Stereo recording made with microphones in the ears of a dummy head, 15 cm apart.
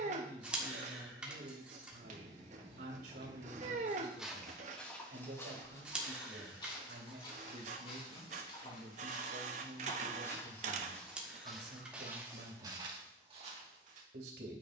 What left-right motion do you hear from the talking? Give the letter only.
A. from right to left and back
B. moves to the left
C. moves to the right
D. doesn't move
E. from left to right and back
D.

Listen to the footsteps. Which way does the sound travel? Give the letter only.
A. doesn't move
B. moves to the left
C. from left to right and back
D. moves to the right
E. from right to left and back
E.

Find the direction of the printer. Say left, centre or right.
right.